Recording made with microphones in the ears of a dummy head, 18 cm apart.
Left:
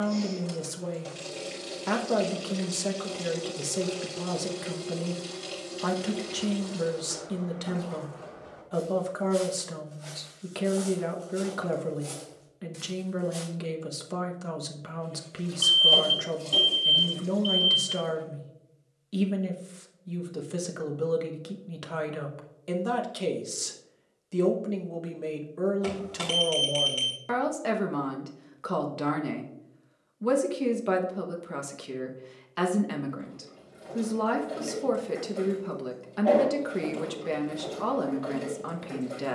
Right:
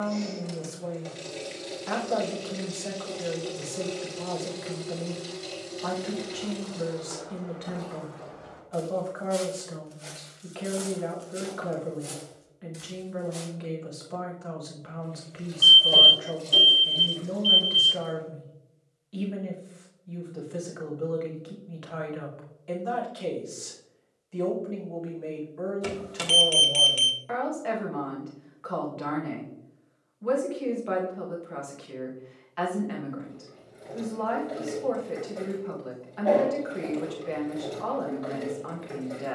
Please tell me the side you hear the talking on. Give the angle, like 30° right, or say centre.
50° left.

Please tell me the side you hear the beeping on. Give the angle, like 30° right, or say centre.
20° right.